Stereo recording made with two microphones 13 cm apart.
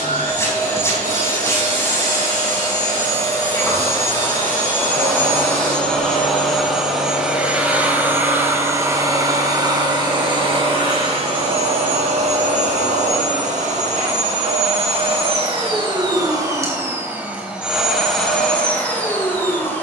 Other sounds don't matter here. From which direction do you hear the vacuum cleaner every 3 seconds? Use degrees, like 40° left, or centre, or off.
20° left, 20° left, 10° right, 40° right, 60° right, 30° right, 10° left.